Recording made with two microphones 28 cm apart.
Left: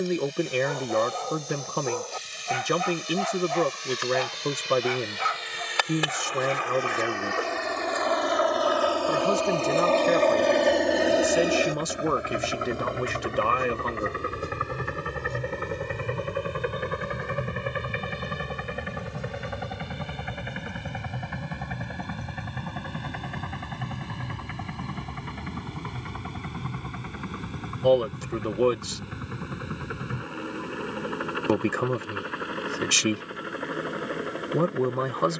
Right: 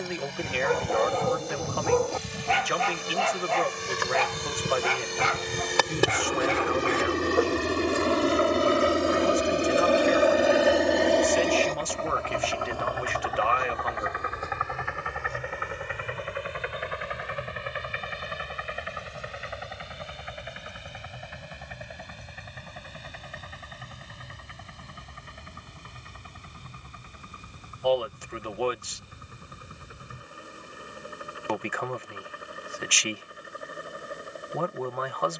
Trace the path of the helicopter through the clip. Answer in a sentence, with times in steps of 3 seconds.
In this clip you hear the helicopter on the right from 0 s, in the centre from 9 s and on the left from 12 s.